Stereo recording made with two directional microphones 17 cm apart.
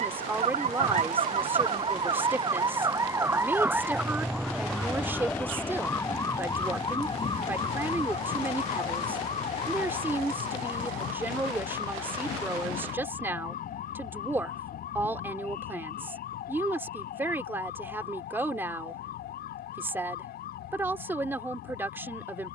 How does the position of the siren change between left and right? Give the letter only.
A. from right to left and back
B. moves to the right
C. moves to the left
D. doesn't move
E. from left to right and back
C.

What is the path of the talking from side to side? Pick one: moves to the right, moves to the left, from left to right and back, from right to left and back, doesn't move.
doesn't move.